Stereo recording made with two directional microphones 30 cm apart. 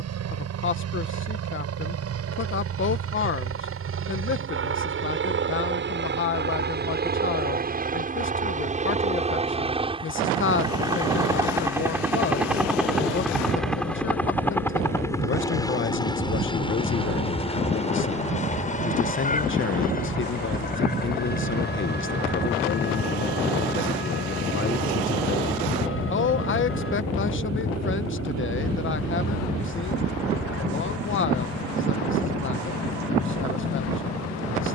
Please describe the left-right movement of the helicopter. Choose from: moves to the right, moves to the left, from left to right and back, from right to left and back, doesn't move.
moves to the left.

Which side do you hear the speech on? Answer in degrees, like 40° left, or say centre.
40° left.